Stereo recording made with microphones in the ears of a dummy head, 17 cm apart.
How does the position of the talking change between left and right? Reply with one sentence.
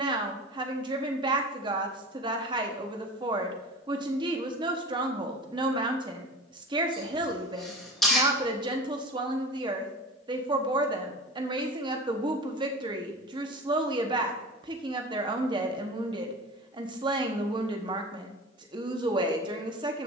In this clip you hear the talking stay put.